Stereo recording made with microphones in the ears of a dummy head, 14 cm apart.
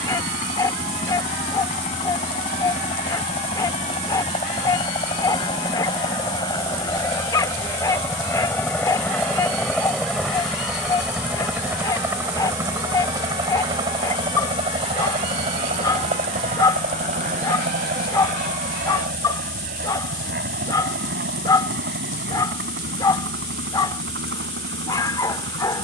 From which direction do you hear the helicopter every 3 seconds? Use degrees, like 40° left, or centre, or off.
40° left, 30° left, 20° left, centre, 20° right, 40° right, 50° right, 60° right, 70° right.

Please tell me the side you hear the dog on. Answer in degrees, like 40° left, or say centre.
20° left.